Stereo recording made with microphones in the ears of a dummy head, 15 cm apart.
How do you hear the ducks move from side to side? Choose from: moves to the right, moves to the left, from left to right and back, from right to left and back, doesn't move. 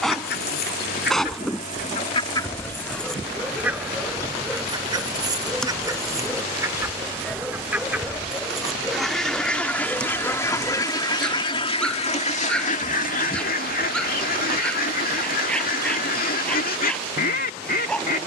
from left to right and back.